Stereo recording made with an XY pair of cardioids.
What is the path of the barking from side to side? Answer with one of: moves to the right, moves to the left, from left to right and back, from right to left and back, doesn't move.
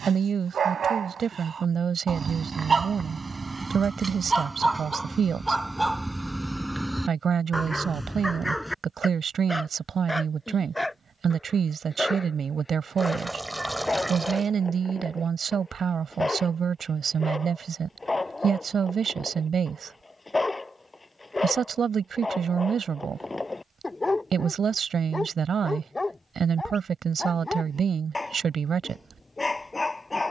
moves to the left.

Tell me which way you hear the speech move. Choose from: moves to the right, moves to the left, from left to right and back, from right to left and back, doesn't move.
doesn't move.